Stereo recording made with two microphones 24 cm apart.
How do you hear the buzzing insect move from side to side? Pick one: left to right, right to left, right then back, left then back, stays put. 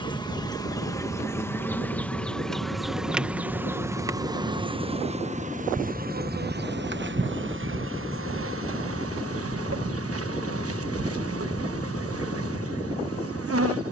left to right.